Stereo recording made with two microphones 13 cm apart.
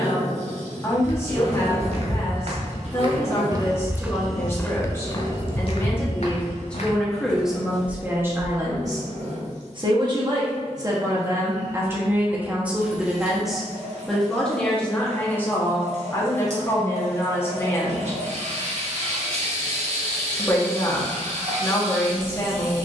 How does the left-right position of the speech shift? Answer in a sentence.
You can hear the speech move from left to right and back again.